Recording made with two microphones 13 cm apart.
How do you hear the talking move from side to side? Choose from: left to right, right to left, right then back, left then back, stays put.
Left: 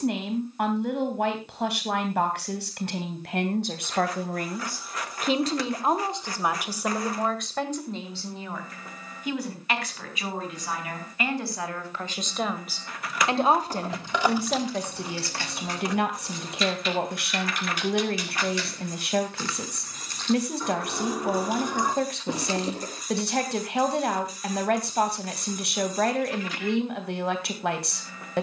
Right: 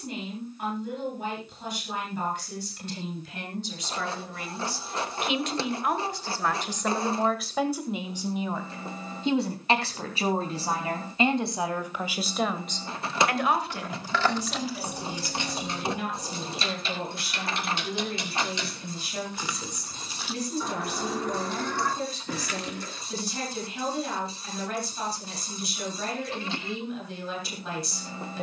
right then back.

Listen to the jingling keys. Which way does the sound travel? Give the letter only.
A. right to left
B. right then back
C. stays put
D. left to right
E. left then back
B.